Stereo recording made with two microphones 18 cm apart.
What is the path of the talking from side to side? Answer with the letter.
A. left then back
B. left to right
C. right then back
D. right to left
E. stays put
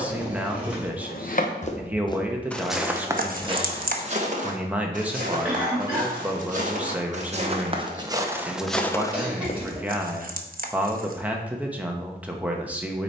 E.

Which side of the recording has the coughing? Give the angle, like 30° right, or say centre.
10° right.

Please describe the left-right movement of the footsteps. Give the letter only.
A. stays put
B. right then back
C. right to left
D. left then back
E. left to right
B.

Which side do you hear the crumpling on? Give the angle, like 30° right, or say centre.
60° right.